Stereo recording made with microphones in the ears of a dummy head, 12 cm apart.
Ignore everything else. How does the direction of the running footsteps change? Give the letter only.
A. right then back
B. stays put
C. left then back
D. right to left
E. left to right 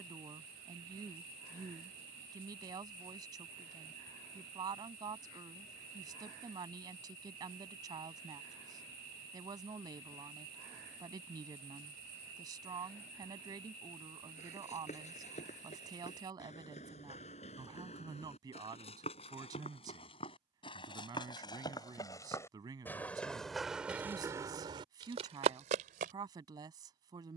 E.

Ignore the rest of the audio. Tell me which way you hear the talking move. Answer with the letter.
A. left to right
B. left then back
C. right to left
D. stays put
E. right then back
D.